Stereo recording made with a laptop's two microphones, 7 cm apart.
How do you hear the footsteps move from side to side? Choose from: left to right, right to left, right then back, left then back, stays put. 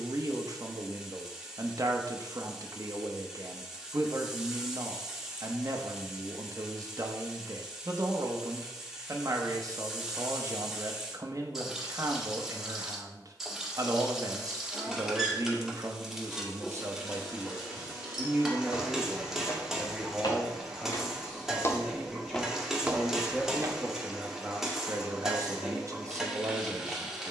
left to right.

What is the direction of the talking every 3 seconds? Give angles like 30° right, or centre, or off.
50° right, 50° right, 50° right, 50° right, 50° right, 40° right, centre, centre, 40° right.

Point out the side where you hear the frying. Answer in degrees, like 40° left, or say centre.
centre.